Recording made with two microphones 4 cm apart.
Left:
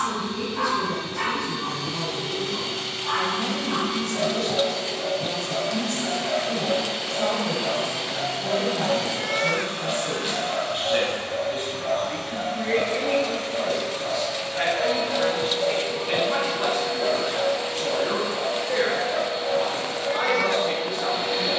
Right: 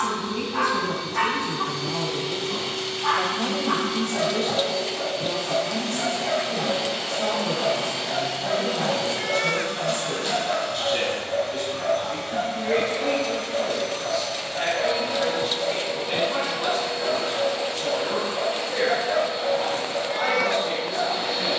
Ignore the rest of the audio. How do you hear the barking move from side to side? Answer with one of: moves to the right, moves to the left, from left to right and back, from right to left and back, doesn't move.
from right to left and back.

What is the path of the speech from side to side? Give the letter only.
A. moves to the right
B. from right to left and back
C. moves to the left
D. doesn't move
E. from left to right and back
C.